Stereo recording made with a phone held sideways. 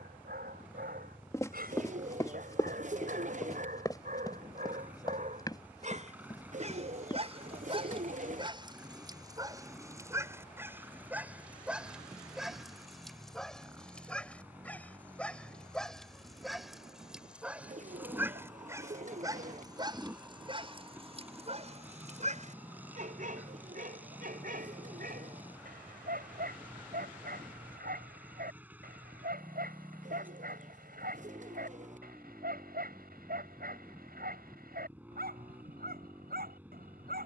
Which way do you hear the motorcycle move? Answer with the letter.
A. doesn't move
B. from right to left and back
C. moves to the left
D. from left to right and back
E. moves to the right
A.